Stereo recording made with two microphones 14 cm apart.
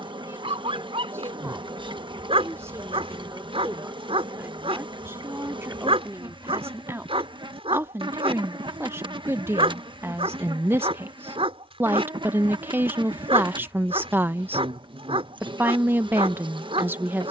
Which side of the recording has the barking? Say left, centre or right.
right.